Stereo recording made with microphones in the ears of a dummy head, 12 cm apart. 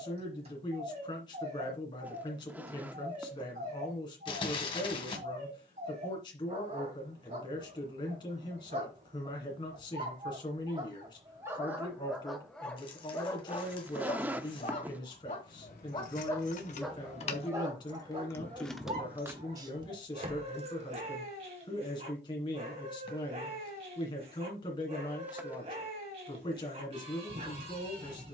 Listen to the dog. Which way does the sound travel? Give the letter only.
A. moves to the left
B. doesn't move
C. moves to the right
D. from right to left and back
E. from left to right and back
D.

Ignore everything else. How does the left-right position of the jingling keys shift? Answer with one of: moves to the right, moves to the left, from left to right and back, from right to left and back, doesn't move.
moves to the right.